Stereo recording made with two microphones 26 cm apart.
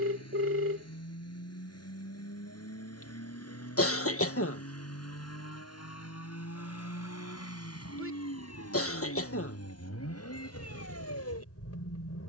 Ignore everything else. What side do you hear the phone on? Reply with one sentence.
You can hear the phone on the right.